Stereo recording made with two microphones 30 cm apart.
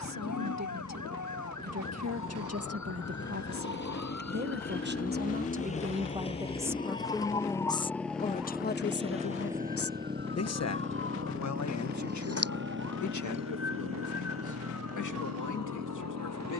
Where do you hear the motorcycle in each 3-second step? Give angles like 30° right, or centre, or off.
50° left, 30° left, 10° left, 20° right, 40° right, 60° right.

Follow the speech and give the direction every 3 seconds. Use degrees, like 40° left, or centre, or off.
60° right, 40° right, 10° left, 50° left, 70° left, 80° left.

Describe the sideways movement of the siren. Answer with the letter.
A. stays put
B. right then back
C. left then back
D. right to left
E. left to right
E.